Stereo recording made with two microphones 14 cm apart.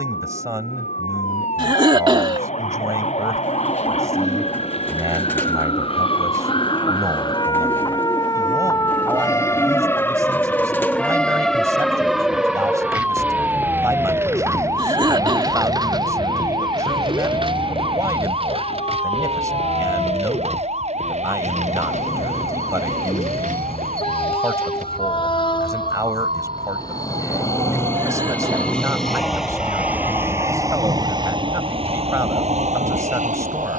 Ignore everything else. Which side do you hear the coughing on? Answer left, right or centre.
right.